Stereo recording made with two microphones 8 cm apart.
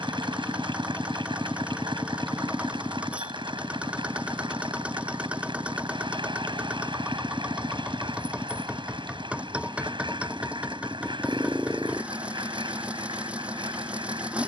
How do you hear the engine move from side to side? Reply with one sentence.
In this clip you hear the engine stay put.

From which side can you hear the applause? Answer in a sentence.
You can hear the applause on the right.